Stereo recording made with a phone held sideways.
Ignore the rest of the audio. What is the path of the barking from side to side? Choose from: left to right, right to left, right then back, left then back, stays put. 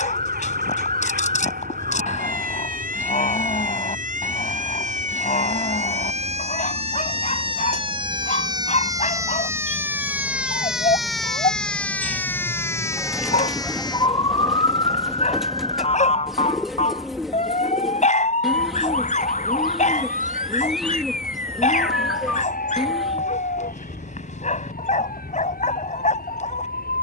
stays put.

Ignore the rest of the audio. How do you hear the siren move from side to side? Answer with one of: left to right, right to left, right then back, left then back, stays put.
right to left.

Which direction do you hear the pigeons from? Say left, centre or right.
centre.